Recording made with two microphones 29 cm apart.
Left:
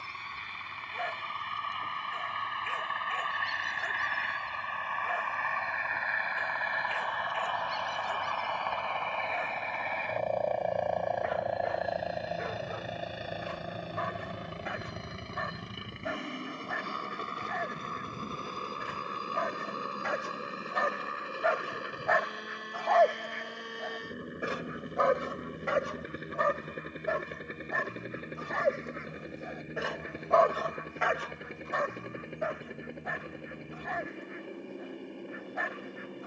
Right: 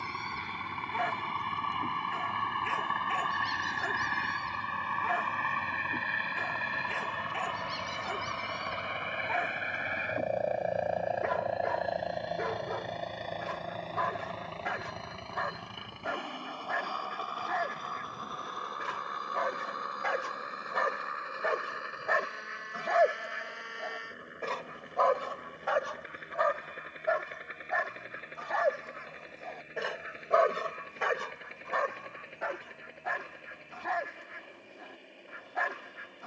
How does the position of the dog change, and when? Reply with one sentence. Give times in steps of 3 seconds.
In this clip you hear the dog on the right from 0 s, on the left from 24 s and on the right from 30 s.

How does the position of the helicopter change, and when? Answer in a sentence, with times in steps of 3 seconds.
In this clip you hear the helicopter on the right from 0 s, in the centre from 9 s and on the left from 15 s.